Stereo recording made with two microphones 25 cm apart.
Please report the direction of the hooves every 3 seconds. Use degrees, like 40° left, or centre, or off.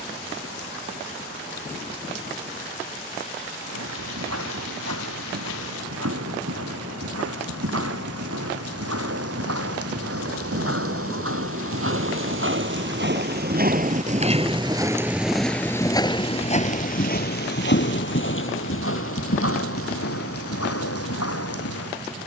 off, 80° right, 70° right, 60° right, 40° right, 20° left, 60° left, 70° left.